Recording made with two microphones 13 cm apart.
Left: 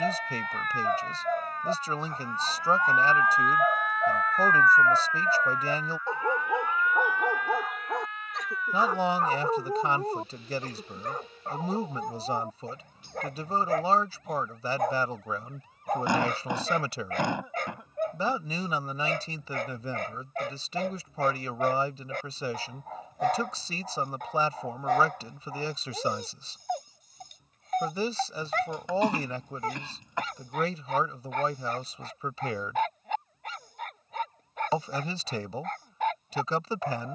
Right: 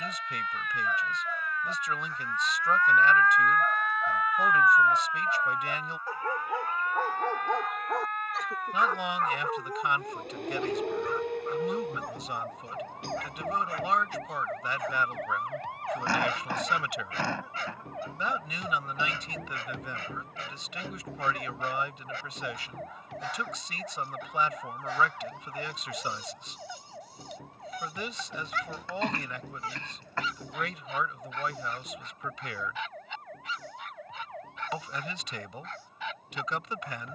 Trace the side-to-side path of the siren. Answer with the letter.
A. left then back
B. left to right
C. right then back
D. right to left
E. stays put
B.